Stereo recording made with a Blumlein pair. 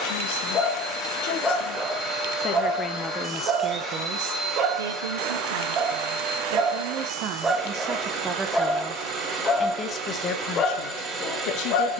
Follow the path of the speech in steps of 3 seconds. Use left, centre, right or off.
left, right, right, left.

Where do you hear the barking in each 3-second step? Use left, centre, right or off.
centre, right, centre, left.